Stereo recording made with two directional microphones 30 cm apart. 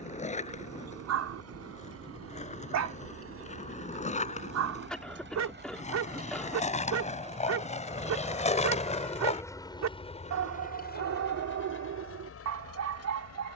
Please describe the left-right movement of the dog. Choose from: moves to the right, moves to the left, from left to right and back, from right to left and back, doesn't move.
doesn't move.